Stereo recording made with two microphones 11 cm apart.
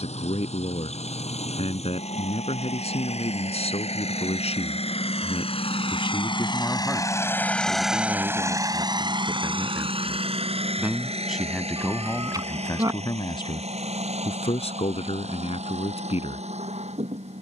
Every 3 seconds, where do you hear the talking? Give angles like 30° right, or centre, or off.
70° left, 70° left, centre, 10° right, 50° left, 70° left.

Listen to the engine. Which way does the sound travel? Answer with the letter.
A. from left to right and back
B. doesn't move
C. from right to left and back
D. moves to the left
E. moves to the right
E.